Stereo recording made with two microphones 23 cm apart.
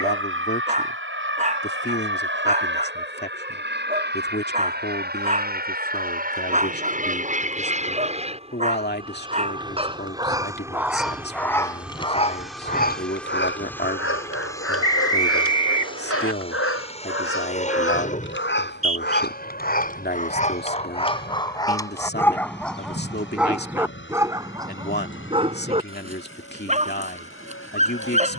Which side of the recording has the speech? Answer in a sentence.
You can hear the speech on the left.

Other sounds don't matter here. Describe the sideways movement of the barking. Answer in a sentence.
You can hear the barking go left and come back.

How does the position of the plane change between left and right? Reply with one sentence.
In this clip you hear the plane move to the left.